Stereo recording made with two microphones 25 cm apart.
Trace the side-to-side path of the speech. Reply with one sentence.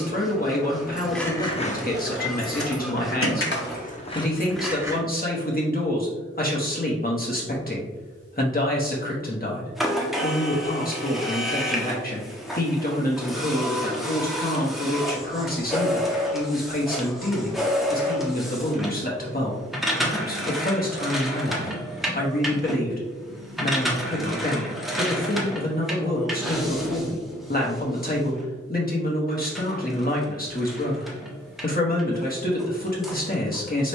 In this clip you hear the speech stay put.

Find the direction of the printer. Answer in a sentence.
In this clip you hear the printer in the centre.